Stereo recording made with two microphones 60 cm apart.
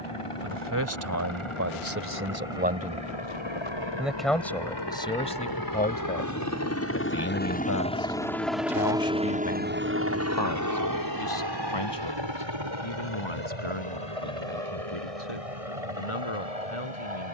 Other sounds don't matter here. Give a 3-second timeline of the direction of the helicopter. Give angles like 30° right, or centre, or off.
60° left, 40° left, 10° left, 30° right, 50° right, 60° right.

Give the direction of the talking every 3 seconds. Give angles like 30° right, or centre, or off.
20° right, 10° left, 30° left, 40° left, 50° left, 50° left.